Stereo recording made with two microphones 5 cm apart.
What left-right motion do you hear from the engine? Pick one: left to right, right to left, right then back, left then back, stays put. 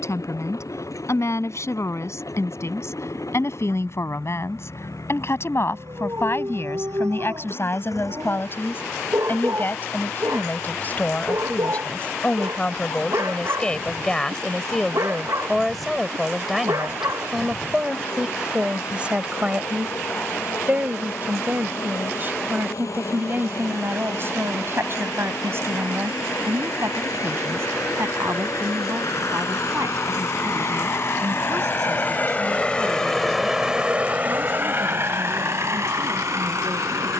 left to right.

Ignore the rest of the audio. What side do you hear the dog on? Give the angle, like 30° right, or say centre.
70° right.